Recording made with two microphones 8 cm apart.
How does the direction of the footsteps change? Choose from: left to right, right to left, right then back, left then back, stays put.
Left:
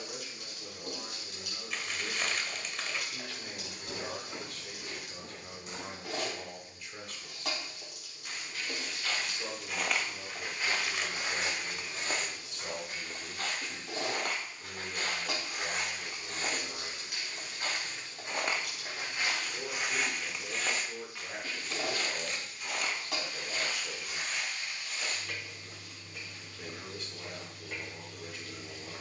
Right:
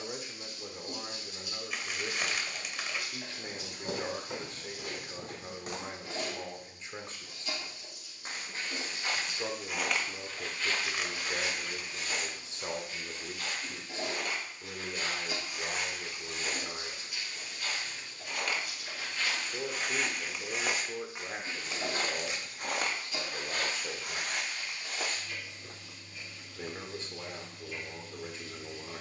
left then back.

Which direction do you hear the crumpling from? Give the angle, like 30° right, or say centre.
centre.